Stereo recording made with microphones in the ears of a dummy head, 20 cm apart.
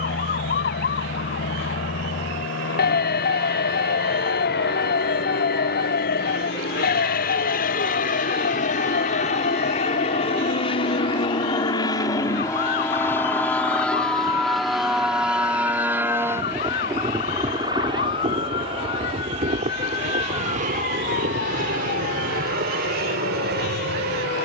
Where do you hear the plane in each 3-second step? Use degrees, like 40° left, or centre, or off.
60° left, 50° left, 40° left, 30° left, 10° left, 10° right, 30° right, 40° right.